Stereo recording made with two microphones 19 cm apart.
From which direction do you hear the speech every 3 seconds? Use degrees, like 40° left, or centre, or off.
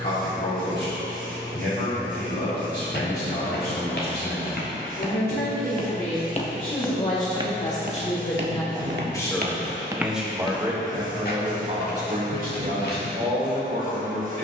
60° left, 60° left, 40° left, 10° right, 50° right.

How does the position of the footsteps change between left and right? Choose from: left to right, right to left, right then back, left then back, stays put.
right then back.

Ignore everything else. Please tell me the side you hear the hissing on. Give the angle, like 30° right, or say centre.
50° right.